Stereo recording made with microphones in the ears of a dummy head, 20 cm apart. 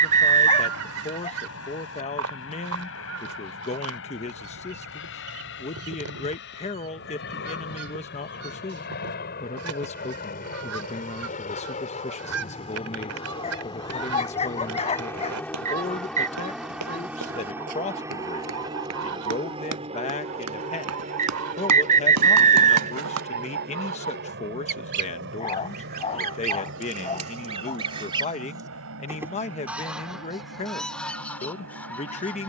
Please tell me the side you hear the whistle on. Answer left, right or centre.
right.